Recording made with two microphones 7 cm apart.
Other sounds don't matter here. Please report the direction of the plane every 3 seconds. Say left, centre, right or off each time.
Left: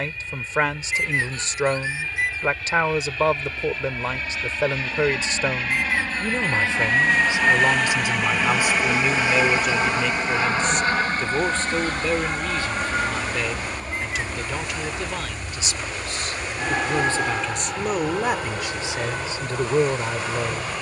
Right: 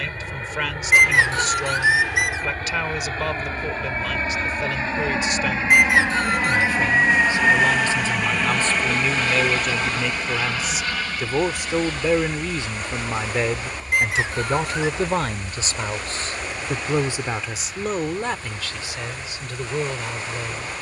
right, right, centre, left, left, left, left.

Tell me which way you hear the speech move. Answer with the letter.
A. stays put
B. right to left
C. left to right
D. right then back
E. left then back
D.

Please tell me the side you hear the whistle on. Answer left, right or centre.
right.